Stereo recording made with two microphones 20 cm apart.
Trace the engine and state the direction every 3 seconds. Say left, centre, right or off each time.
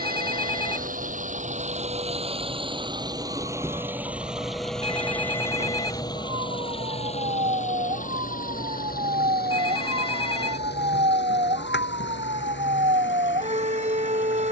right, centre, left, left, left.